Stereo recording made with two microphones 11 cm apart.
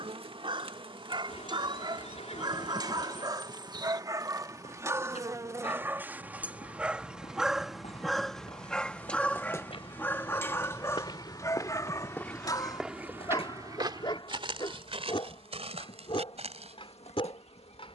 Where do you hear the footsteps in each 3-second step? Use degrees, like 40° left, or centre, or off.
off, 70° left, 70° left, 50° left, 20° right, 70° right.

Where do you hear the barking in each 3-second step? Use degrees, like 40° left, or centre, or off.
50° right, 30° right, centre, 20° left, 40° left, 50° left.